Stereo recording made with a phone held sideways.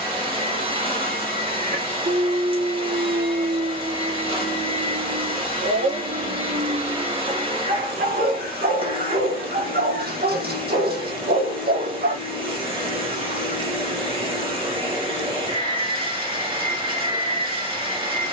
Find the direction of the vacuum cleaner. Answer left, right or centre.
right.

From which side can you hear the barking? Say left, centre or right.
right.